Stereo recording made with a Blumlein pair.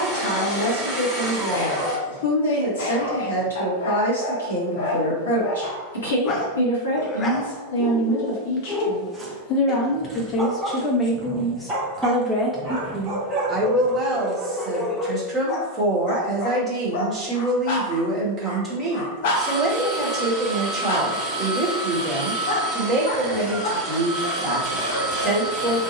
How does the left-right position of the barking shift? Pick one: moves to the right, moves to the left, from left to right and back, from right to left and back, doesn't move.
from left to right and back.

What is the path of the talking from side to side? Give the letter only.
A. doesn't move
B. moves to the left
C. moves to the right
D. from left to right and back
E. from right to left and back
C.